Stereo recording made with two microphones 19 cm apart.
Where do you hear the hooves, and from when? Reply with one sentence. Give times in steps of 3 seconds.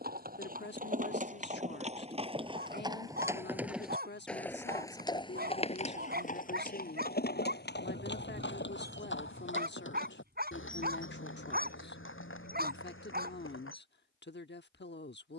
In this clip you hear the hooves on the right from 0 s, in the centre from 3 s and on the left from 6 s.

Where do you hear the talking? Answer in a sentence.
In this clip you hear the talking on the left.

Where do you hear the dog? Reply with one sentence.
You can hear the dog on the right.